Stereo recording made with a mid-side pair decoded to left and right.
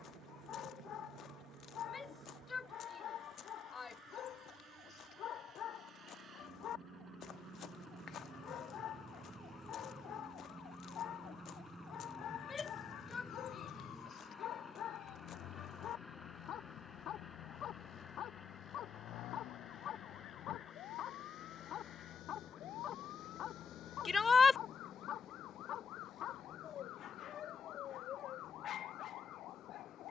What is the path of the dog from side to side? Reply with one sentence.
You can hear the dog stay in one place.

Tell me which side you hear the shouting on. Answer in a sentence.
You can hear the shouting on the left.